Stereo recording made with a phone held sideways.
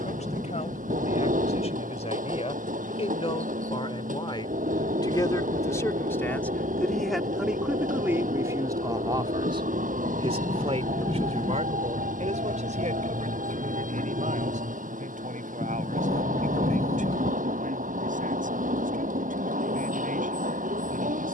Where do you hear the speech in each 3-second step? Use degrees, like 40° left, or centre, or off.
50° left, 30° left, 10° right, 50° right, 70° right, 80° right, 80° right.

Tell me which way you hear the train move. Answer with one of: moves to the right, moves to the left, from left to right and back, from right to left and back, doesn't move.
doesn't move.